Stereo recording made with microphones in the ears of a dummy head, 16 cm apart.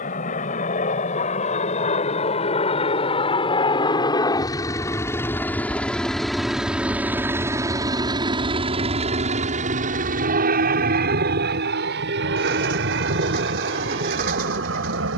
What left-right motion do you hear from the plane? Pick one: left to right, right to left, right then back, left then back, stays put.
left to right.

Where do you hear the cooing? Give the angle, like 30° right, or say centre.
50° right.